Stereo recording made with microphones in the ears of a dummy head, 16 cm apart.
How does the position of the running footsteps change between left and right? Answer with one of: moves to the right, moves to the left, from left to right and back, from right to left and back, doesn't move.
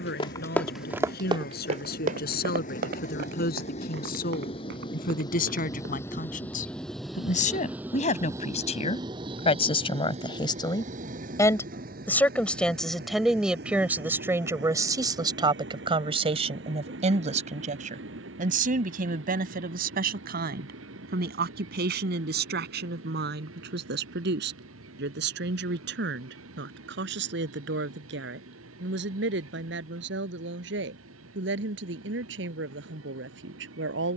moves to the right.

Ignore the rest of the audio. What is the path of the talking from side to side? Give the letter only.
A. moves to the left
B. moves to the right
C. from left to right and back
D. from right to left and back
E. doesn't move
B.